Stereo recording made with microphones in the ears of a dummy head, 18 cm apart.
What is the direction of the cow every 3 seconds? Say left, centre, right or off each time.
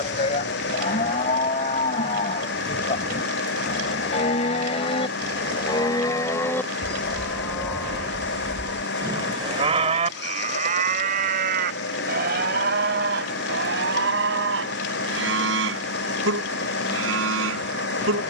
left, left, centre, right, right, right.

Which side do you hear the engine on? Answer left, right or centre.
left.